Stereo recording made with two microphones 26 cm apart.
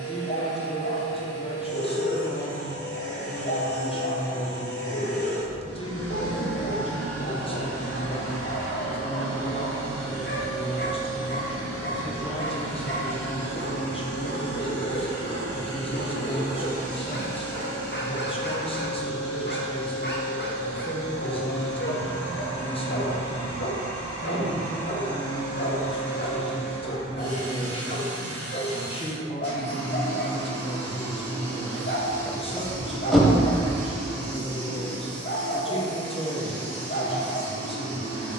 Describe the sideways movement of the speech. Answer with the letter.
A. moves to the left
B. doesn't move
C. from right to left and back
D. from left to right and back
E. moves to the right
B.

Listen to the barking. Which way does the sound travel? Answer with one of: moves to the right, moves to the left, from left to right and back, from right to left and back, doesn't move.
doesn't move.